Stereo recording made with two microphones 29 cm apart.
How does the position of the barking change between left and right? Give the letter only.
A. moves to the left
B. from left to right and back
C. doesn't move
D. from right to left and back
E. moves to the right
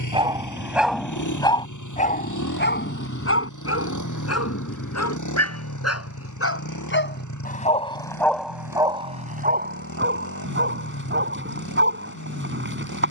D.